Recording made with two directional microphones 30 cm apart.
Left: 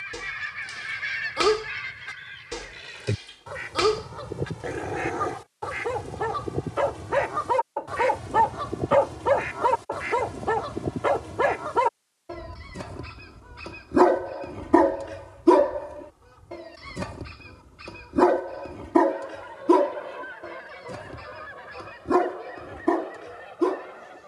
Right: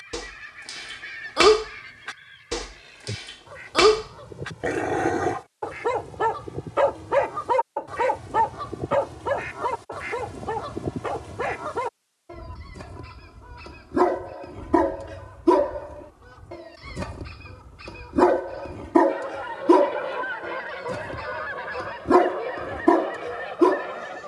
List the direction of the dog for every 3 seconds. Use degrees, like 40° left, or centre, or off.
40° right, 40° right, 10° right, 30° left, 30° left, 10° left, 10° right, 30° right.